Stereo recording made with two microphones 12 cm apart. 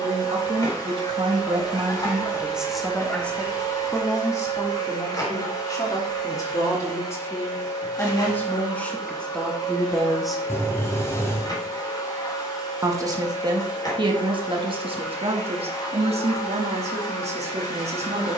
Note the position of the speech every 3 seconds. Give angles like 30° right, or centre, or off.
30° right, 30° left, 20° left, centre, 40° right, 60° right.